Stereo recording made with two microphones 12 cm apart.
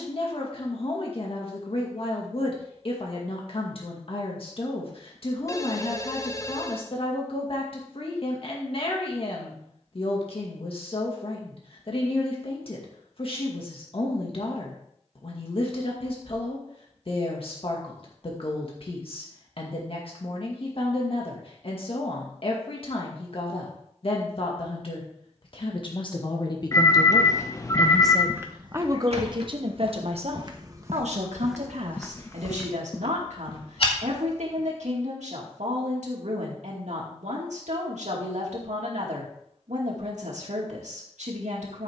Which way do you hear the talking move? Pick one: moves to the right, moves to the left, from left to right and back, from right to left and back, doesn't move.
moves to the right.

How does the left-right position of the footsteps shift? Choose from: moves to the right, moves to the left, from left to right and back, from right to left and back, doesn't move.
from left to right and back.